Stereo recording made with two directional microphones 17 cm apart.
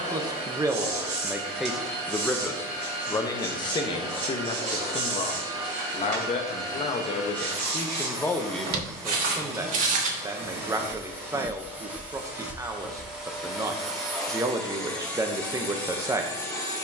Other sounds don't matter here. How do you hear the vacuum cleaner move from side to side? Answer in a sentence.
You can hear the vacuum cleaner move from right to left.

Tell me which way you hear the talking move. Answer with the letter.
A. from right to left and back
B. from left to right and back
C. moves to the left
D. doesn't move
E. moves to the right
A.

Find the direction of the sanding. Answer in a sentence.
In this clip you hear the sanding on the right.